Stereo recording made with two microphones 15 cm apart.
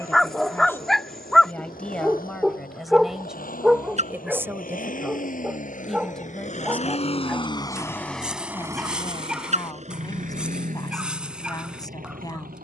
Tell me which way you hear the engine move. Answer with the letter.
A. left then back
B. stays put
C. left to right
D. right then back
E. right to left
C.